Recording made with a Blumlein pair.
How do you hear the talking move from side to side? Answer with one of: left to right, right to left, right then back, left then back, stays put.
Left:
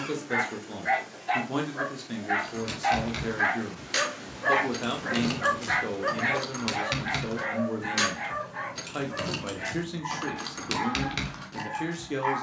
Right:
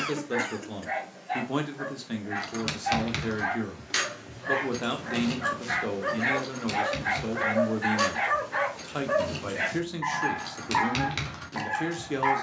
stays put.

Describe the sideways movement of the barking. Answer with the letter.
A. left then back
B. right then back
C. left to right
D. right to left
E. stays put
C.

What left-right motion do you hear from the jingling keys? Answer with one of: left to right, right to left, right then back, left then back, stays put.
left then back.